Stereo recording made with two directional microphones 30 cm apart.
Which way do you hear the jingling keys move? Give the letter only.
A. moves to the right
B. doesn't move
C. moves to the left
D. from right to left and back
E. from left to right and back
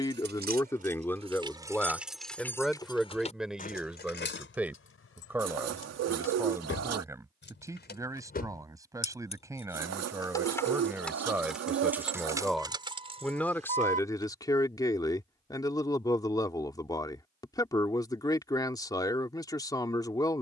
D.